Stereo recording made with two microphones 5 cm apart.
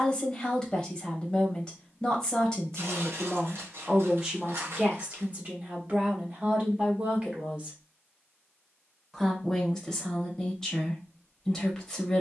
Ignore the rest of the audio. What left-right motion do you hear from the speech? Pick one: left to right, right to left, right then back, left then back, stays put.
right then back.